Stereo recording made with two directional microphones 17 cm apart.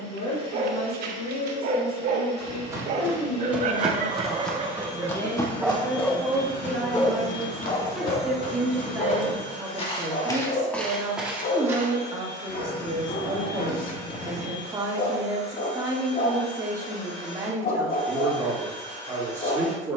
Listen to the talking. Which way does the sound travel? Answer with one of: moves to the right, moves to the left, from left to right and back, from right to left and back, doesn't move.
moves to the right.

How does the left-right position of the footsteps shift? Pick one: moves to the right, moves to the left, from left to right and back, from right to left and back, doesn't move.
from right to left and back.